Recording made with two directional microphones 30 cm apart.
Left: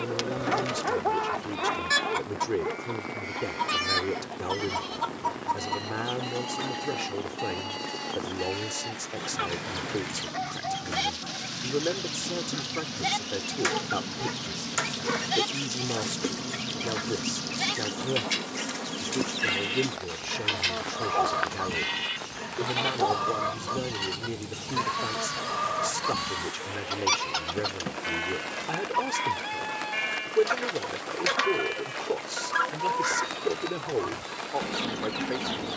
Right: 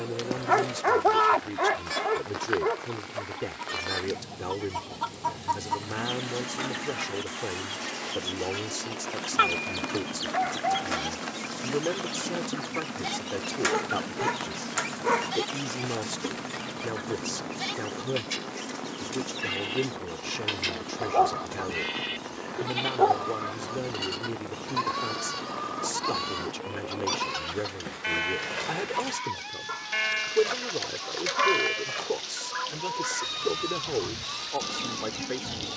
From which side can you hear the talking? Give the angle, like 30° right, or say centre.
centre.